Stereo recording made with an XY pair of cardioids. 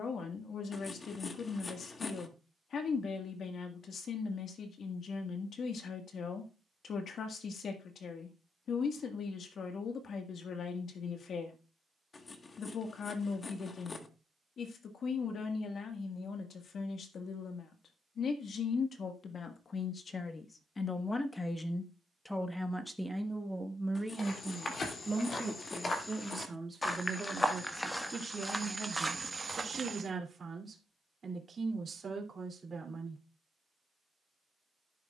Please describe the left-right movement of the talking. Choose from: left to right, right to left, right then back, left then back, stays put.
left to right.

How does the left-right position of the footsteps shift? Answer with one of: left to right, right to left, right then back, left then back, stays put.
left to right.